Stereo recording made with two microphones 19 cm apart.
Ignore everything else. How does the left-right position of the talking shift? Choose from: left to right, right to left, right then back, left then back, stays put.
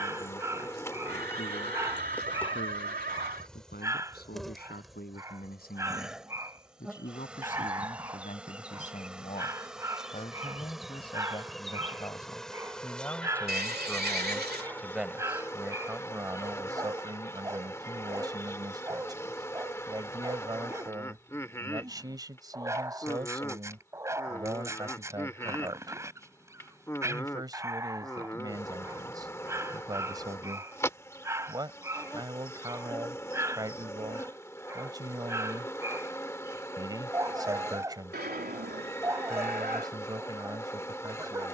left to right.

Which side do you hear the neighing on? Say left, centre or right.
right.